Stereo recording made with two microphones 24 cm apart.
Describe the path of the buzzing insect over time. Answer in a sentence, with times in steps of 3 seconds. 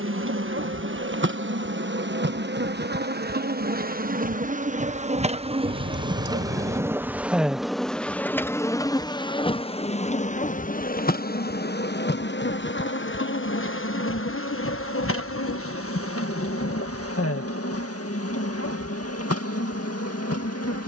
In this clip you hear the buzzing insect on the right from 0 s, in the centre from 6 s and on the left from 9 s.